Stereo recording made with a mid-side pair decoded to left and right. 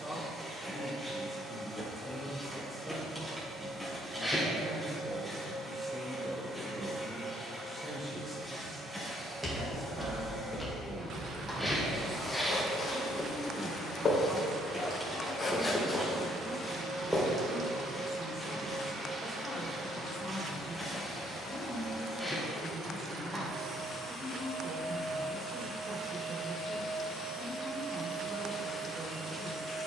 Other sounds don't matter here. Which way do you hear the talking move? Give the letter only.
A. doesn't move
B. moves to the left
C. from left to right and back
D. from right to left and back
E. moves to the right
A.